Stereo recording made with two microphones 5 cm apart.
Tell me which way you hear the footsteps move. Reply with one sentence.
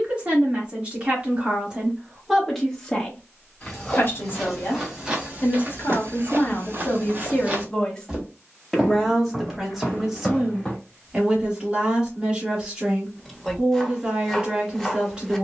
In this clip you hear the footsteps go right and come back.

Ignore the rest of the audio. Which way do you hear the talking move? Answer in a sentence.
You can hear the talking move from right to left and back again.